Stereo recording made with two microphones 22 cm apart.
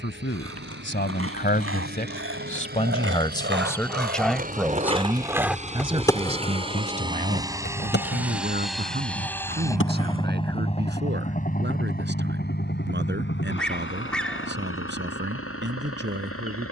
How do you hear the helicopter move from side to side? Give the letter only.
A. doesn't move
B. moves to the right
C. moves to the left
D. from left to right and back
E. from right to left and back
C.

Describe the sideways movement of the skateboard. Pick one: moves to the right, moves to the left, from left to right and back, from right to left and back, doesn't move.
moves to the left.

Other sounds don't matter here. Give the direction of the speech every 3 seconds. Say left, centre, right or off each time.
left, centre, right, right, right, right.